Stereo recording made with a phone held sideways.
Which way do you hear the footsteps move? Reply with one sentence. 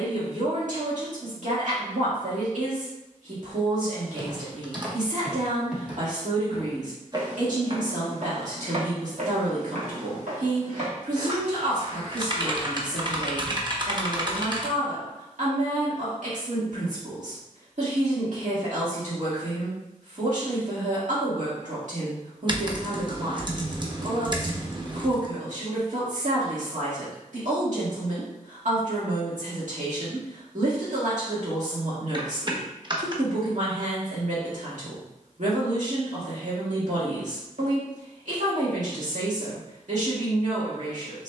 You can hear the footsteps go right and come back.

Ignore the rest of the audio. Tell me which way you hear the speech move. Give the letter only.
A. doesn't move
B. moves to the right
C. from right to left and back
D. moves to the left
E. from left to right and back
A.